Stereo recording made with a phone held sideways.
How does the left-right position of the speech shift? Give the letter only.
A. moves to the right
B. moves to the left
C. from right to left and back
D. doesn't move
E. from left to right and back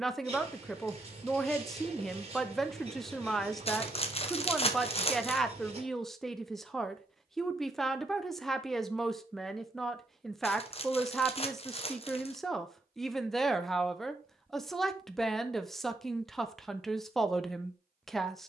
D.